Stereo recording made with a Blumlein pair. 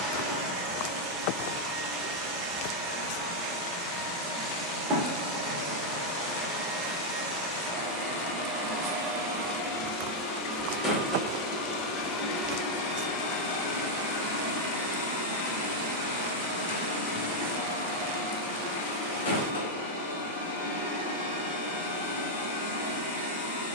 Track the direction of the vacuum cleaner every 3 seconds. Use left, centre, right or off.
right, right, right, centre, left, left, left, left.